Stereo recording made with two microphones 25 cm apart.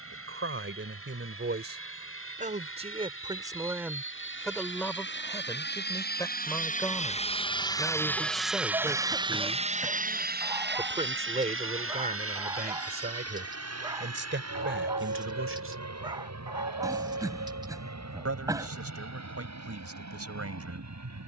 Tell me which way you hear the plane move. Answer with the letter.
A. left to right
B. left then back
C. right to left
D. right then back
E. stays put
A.